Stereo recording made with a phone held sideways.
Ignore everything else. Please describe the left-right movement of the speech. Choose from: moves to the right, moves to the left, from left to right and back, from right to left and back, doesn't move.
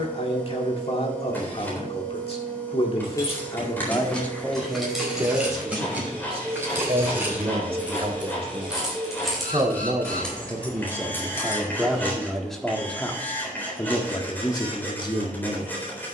from left to right and back.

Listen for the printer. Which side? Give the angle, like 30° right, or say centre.
10° left.